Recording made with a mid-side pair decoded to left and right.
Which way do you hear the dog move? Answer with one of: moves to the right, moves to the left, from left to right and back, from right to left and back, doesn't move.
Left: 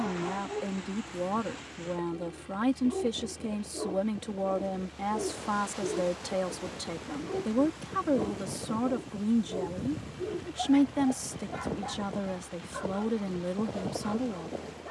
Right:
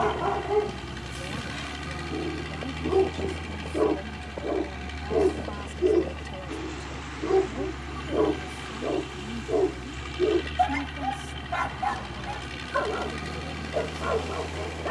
doesn't move.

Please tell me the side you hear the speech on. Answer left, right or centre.
left.